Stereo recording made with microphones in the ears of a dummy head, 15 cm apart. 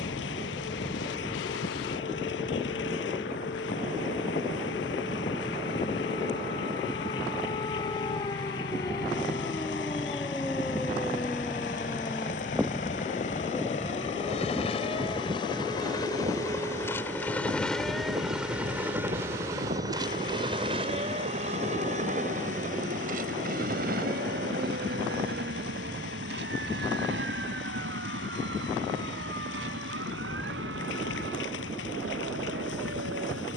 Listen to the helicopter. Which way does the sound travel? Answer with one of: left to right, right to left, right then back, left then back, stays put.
left to right.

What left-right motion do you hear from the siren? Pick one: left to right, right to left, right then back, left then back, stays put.
left to right.